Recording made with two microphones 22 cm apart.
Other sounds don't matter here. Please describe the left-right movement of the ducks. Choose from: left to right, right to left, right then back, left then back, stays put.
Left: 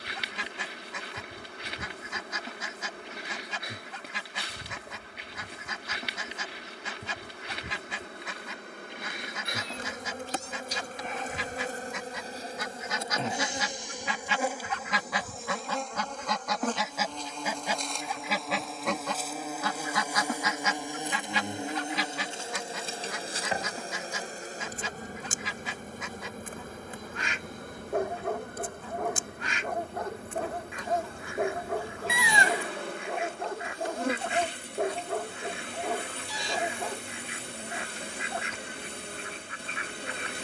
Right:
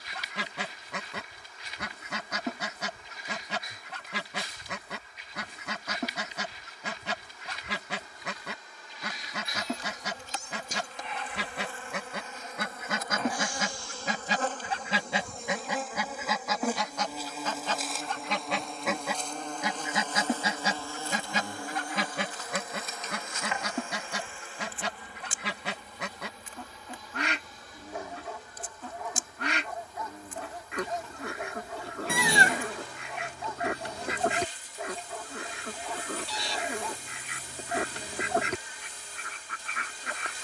left then back.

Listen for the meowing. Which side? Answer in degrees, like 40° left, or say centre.
50° right.